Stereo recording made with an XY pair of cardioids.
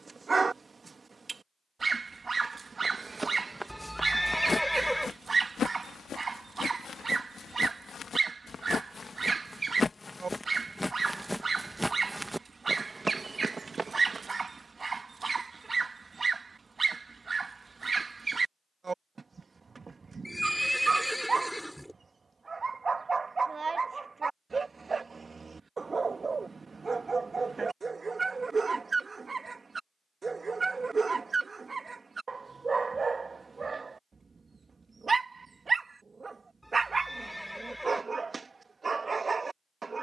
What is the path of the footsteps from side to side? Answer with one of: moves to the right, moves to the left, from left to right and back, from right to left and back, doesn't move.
from right to left and back.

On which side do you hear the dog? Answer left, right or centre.
right.